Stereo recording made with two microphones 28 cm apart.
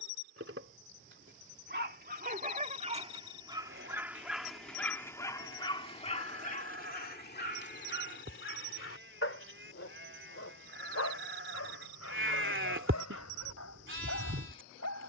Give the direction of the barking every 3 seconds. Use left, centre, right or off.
right, centre, left, left, left.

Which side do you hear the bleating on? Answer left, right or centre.
right.